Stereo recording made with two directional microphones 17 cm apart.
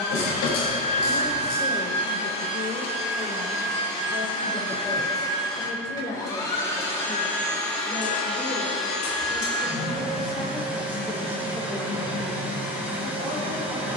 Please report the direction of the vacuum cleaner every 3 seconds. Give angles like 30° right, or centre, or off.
60° left, 40° left, 10° left, 10° right, 10° right.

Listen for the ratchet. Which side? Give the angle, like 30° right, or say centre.
70° left.